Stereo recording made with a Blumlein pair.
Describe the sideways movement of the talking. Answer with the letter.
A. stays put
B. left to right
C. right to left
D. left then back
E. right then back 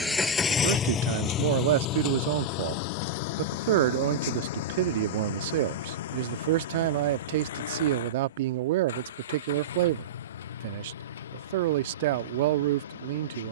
A.